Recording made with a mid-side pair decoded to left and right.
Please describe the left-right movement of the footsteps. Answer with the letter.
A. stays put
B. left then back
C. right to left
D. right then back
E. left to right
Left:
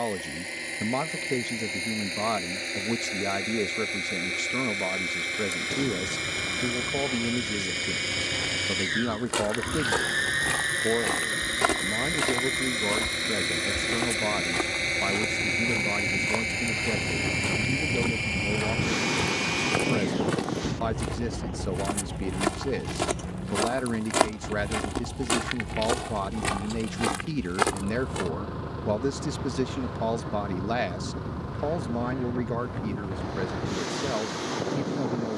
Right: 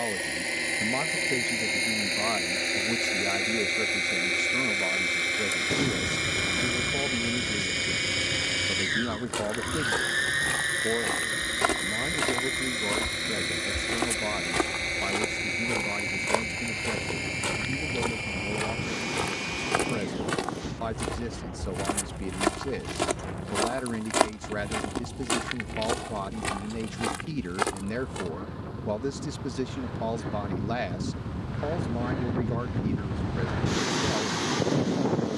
D.